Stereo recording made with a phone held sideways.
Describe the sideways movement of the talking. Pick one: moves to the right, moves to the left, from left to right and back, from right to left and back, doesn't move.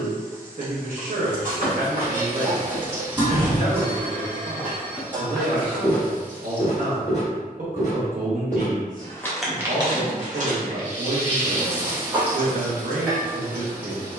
doesn't move.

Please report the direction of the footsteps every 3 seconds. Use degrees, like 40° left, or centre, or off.
60° right, 10° right, 40° left, 30° right, off.